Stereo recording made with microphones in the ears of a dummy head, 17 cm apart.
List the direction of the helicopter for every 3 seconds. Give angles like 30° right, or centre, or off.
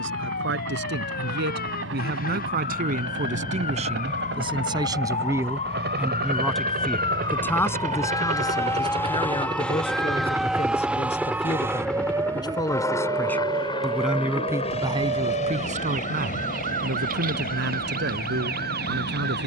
70° right, 60° right, 40° right, 10° right, 20° left, 40° left, 50° left.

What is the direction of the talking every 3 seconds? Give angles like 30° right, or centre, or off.
60° right, 30° right, 10° left, 30° left, centre, 50° right, 70° right.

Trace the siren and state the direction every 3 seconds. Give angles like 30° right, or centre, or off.
60° left, 40° left, 20° left, centre, 30° right, 50° right, 50° right.